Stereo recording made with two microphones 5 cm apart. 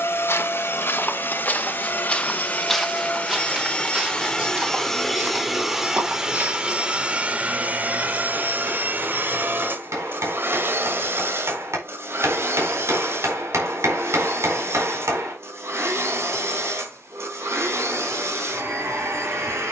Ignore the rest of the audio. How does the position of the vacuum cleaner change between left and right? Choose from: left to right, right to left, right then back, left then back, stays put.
left to right.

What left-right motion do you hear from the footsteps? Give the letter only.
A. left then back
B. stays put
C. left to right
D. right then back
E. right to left
C.